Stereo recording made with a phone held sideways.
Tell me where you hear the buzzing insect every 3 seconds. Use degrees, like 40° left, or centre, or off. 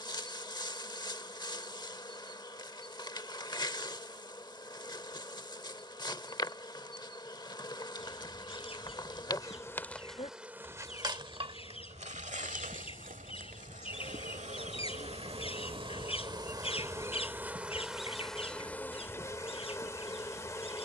30° left, 30° left, 30° left, 10° right, 50° right, 20° right, 10° left.